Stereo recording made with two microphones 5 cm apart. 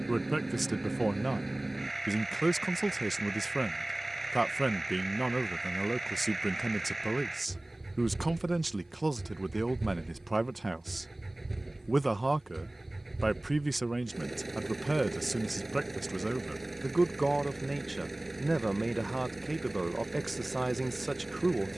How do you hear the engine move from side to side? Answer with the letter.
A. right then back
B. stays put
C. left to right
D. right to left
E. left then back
B.